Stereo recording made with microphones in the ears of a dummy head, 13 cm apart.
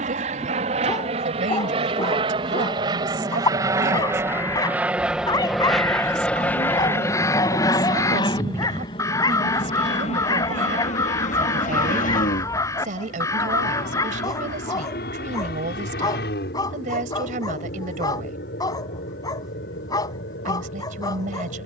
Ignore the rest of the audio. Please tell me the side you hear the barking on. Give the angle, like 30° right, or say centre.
30° left.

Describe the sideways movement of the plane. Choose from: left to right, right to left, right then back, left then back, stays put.
right to left.